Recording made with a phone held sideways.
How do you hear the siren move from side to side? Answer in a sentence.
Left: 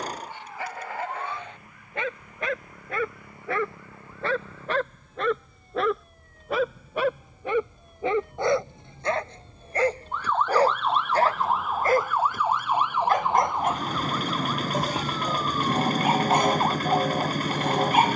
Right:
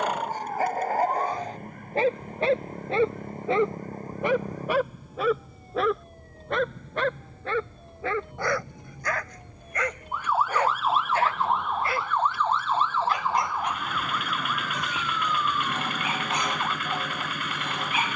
You can hear the siren move from right to left.